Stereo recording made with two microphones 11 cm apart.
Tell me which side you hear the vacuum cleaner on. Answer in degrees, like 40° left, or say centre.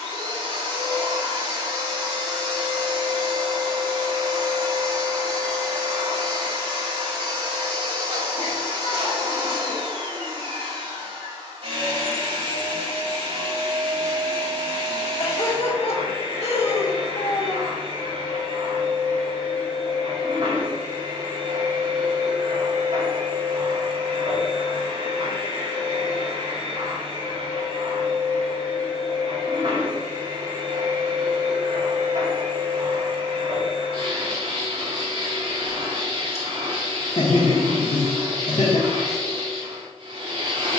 70° right.